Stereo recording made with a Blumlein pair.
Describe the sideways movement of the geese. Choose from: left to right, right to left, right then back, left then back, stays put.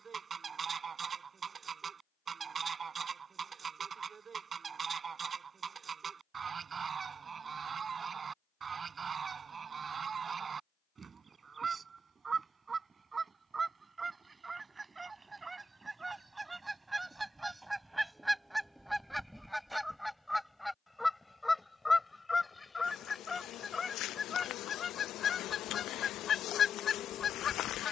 right to left.